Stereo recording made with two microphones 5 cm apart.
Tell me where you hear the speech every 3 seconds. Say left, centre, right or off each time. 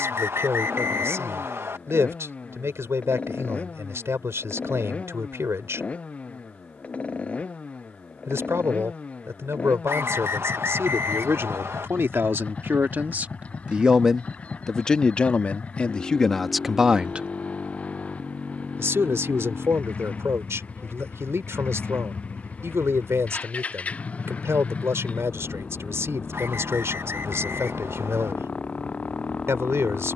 right, right, right, right, right, centre, right, right, right, right.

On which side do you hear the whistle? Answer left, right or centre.
right.